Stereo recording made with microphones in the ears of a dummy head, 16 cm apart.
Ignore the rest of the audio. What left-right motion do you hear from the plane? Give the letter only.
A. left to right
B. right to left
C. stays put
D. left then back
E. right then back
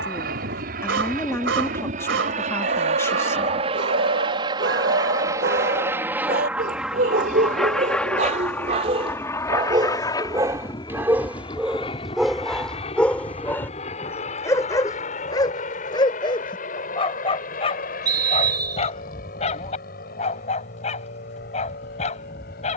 B.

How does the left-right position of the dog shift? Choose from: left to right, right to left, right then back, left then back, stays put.
right to left.